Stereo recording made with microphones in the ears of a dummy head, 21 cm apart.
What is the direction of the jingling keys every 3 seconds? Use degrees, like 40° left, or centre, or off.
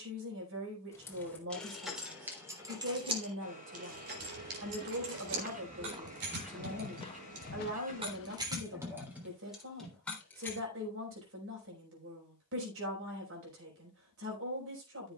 centre, 50° right, 30° right, centre, off.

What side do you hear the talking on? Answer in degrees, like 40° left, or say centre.
60° right.